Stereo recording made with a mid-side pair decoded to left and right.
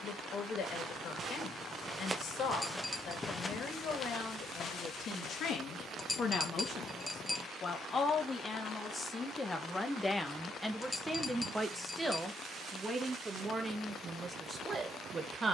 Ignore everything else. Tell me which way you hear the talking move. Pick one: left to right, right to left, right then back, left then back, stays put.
left to right.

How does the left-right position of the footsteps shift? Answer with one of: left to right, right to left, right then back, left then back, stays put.
right to left.